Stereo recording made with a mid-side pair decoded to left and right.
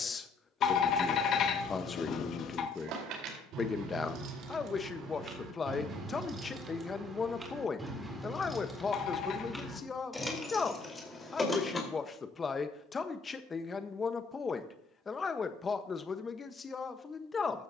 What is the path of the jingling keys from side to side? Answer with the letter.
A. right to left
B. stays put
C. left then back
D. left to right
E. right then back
A.